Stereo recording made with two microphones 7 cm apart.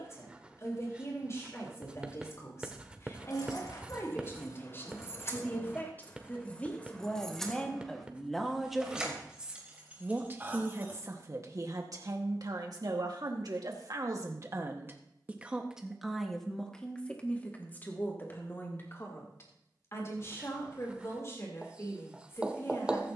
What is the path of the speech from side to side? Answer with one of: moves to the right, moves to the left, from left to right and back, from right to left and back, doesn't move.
from left to right and back.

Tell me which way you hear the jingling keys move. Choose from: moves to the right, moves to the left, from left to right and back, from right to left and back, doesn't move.
moves to the right.